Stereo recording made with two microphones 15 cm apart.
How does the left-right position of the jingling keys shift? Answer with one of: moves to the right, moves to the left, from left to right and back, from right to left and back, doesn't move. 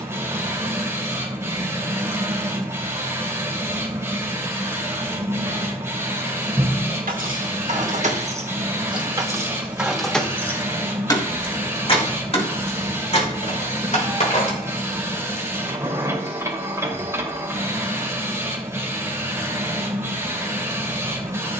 moves to the left.